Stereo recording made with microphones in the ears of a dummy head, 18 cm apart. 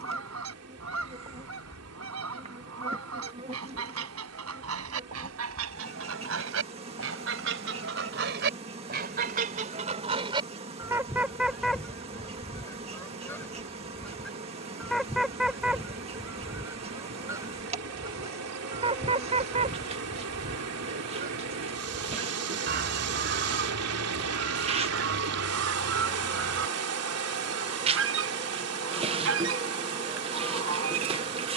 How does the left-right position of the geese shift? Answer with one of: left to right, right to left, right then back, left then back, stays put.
left then back.